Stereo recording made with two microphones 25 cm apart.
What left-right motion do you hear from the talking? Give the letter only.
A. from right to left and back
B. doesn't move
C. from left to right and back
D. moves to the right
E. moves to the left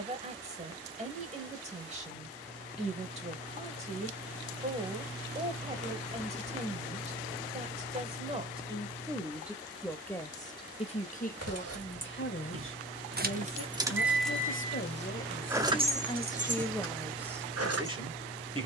A.